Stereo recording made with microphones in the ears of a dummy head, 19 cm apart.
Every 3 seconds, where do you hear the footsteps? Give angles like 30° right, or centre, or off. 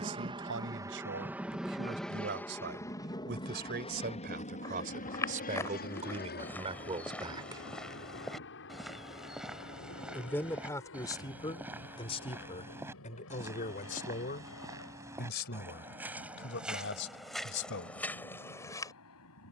off, 10° left, centre, 10° right, 10° right, centre, 10° left.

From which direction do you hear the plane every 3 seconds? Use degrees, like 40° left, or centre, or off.
10° right, 30° left, 50° left, 60° left, 60° left, 70° left, 70° left.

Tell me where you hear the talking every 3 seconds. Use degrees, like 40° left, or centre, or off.
50° right, 40° right, 20° right, 10° left, 30° left, 50° left, off.